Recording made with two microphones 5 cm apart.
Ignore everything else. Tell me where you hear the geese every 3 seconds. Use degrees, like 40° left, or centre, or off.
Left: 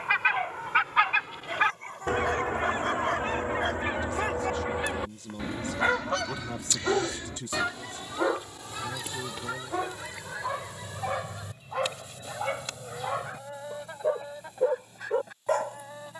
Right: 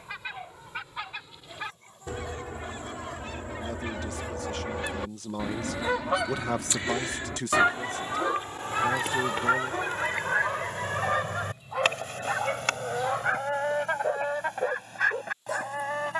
60° left, 20° left, 30° right, 50° right, 60° right, 70° right.